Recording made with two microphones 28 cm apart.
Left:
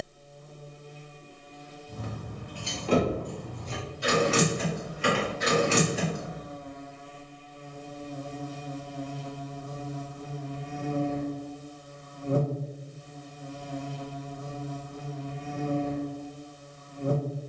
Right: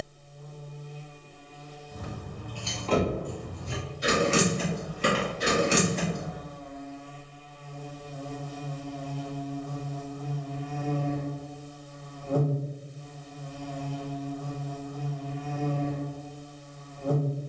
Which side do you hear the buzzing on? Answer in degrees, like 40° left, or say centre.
20° left.